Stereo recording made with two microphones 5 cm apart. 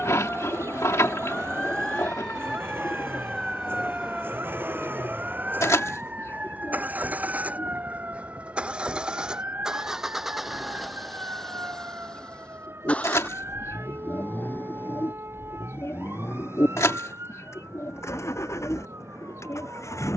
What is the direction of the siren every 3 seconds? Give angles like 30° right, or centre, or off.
20° left, 10° right, 30° right, 40° right, 50° right, 50° right, 60° right.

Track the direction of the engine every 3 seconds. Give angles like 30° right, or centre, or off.
50° right, 40° right, 30° right, centre, 30° left, 60° left, 70° left.